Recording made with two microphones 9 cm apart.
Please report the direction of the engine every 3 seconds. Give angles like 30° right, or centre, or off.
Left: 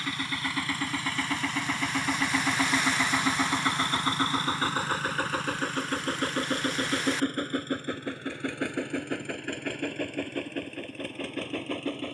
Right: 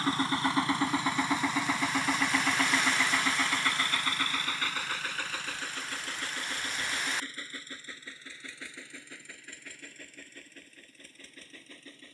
10° right, 30° left, 60° left, 70° left.